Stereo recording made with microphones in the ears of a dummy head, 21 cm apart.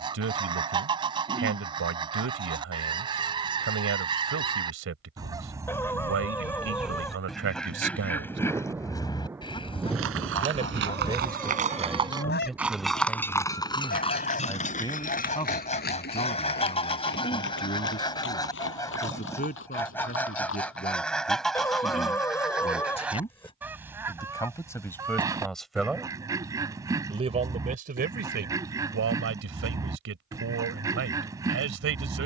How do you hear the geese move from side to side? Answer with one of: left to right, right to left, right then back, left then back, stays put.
left then back.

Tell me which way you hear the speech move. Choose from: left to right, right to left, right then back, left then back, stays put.
left then back.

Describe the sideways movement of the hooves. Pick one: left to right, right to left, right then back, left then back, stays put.
right to left.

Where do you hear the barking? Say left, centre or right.
centre.